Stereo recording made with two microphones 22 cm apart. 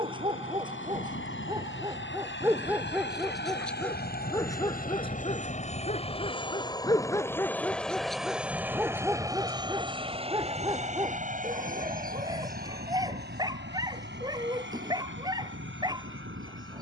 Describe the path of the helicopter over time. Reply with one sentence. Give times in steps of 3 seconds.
In this clip you hear the helicopter on the left from 0 s, in the centre from 6 s and on the right from 9 s.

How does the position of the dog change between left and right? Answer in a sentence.
You can hear the dog move from right to left and back again.